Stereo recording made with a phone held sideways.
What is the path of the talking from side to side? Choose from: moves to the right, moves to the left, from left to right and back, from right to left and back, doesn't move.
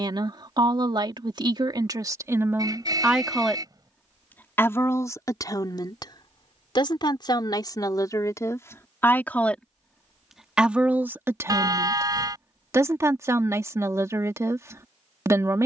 from right to left and back.